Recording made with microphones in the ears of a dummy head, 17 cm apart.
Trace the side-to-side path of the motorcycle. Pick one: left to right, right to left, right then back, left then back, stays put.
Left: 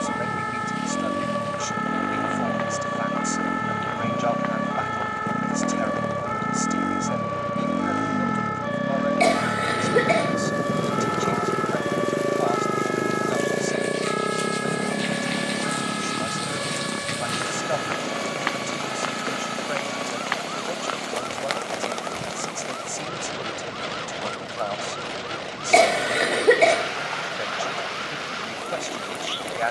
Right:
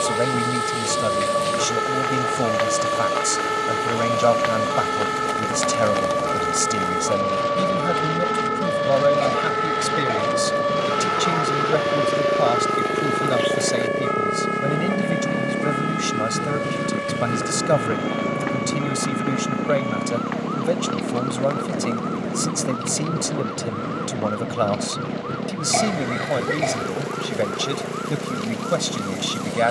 left to right.